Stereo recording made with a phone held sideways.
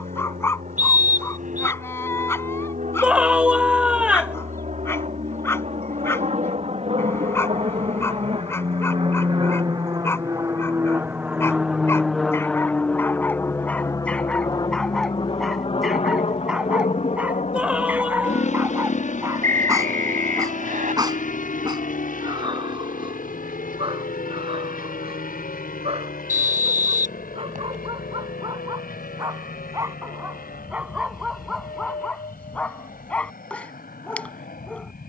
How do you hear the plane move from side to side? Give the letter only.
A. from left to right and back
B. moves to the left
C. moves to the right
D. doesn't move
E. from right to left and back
B.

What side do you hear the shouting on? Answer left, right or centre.
centre.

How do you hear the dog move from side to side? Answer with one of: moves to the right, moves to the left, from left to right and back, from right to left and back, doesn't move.
from left to right and back.